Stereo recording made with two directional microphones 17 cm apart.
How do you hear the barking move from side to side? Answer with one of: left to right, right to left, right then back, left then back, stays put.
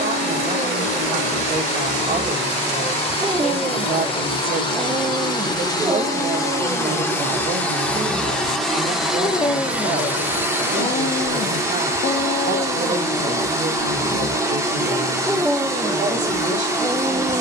left then back.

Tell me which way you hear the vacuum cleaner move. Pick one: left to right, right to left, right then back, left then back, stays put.
left to right.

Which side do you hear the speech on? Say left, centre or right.
right.